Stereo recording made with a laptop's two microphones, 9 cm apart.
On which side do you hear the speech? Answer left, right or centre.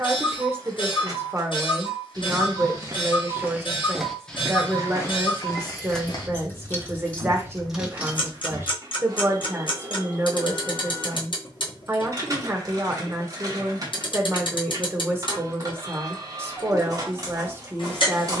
right.